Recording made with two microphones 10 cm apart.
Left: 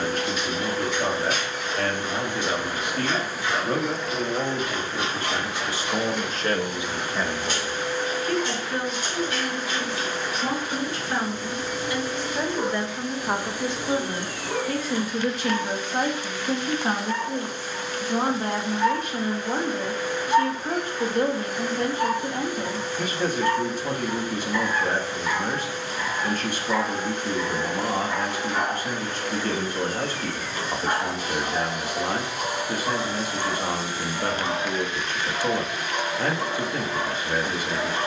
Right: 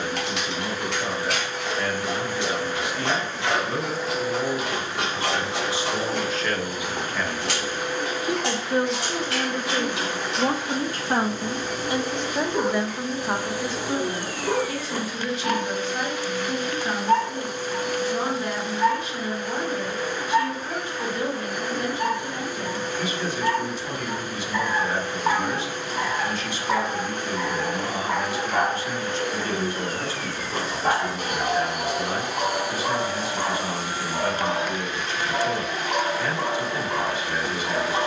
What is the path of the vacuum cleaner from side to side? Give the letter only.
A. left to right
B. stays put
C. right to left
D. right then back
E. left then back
A.